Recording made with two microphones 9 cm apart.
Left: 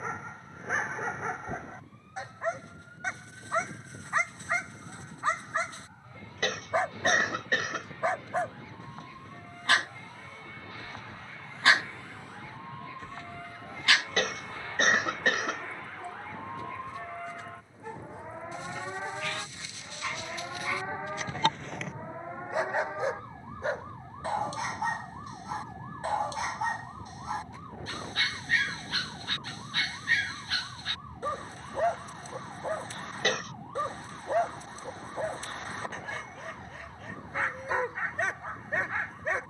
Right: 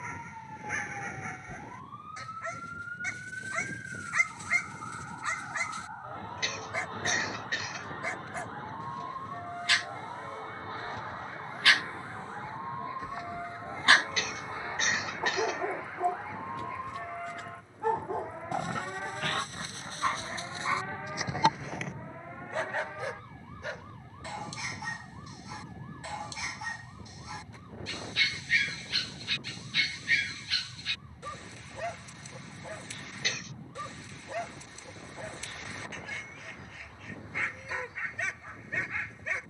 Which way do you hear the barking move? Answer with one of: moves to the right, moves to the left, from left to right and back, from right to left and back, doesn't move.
from left to right and back.